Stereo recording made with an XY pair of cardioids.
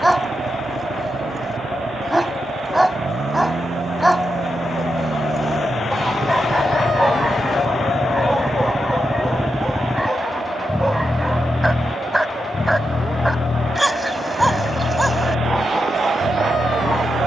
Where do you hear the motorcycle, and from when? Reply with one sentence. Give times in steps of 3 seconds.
You can hear the motorcycle on the right from 0 s, in the centre from 9 s and on the left from 12 s.